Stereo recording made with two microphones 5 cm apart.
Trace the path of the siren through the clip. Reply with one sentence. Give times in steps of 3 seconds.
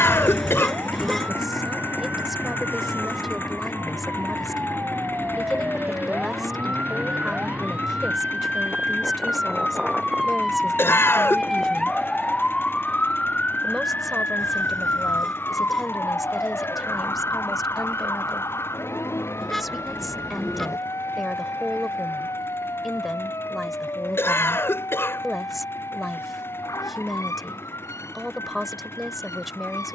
You can hear the siren on the right from 0 s, in the centre from 9 s and on the left from 12 s.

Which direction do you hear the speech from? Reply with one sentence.
In this clip you hear the speech in the centre.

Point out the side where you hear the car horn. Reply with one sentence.
You can hear the car horn in the centre.